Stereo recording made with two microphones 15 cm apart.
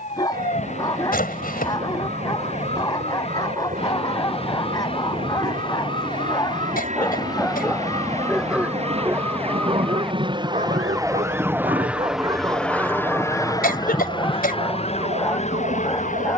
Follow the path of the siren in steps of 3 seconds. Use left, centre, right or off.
left, left, left, centre, right, right.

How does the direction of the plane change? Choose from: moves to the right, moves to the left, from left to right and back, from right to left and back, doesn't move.
moves to the left.